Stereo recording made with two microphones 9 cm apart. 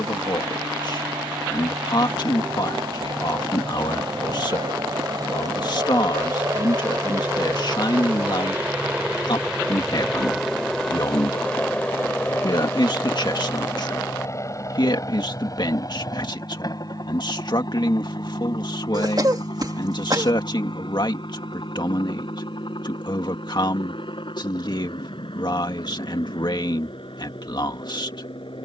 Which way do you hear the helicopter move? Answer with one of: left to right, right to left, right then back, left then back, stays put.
right to left.